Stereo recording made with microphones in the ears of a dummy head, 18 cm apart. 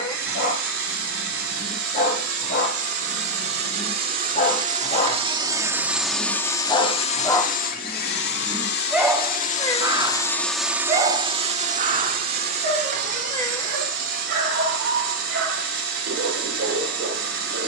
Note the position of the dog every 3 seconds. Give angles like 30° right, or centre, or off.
50° left, 40° left, 10° left, 30° right, 60° right, 70° right.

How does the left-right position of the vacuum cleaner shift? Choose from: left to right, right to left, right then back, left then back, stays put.
left then back.